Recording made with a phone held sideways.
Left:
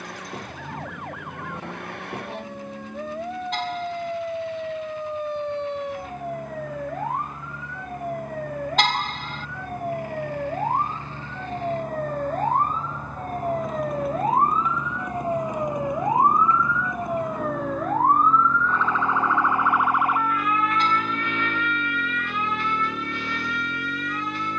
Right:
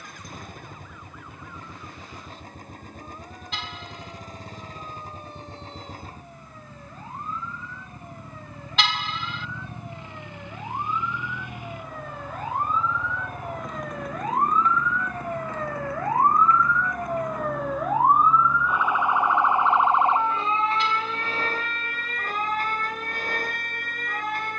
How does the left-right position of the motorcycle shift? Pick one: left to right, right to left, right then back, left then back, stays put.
right to left.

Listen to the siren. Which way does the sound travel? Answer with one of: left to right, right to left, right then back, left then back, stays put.
left to right.